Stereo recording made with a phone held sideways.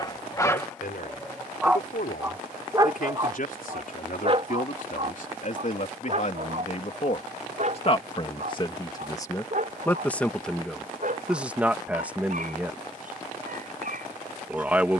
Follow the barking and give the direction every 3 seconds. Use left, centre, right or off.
centre, right, right, right, right.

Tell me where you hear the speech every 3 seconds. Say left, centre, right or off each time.
left, left, left, centre, centre.